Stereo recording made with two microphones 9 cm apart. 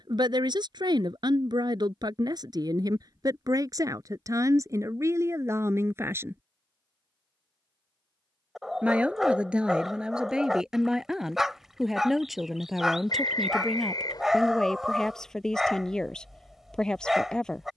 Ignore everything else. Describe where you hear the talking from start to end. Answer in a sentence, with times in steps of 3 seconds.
In this clip you hear the talking on the right from 0 s and in the centre from 9 s.